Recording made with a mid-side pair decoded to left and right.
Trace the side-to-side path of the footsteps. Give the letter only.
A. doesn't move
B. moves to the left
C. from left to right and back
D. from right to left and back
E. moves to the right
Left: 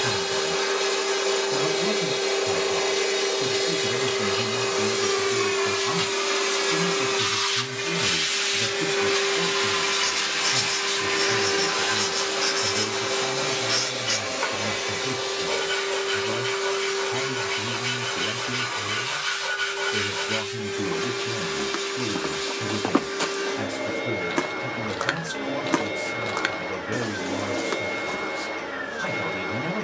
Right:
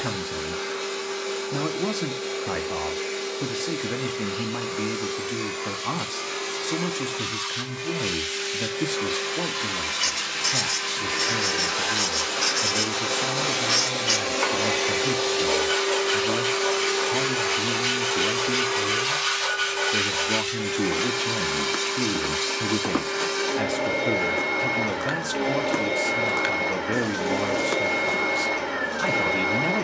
D.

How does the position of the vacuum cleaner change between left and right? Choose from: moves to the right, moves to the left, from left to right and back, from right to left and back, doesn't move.
moves to the right.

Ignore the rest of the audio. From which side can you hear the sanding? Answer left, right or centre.
right.